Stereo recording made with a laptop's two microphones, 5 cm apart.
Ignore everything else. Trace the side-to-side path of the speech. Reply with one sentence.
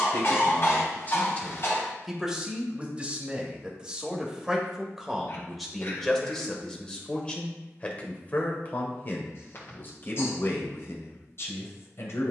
In this clip you hear the speech move from left to right and back again.